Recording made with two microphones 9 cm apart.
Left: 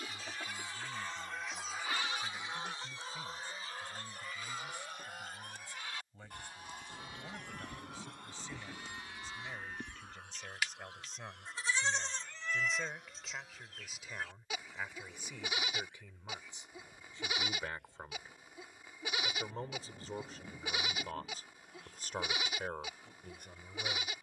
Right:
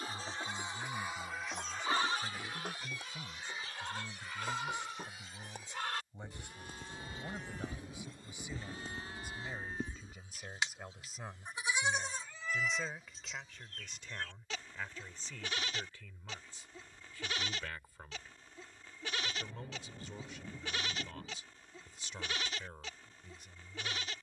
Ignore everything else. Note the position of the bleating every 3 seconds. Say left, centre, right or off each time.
right, right, right, right, centre, centre, centre, centre.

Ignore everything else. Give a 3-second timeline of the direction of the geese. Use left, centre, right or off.
centre, left, left, left, left, left, left, left.